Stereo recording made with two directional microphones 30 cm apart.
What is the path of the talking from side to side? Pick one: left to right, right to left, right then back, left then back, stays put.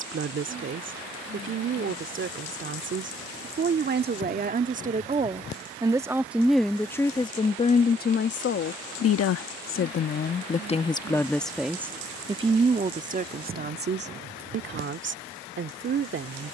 left then back.